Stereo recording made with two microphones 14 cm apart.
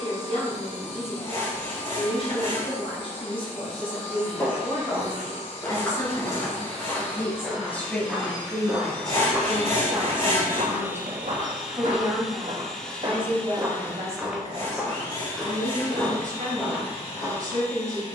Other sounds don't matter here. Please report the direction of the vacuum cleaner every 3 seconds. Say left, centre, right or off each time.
left, left, left, centre, centre, left.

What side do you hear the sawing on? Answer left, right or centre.
left.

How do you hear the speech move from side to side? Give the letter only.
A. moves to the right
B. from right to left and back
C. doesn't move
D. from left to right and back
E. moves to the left
A.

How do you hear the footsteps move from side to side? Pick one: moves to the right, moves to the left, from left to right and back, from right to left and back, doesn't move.
from left to right and back.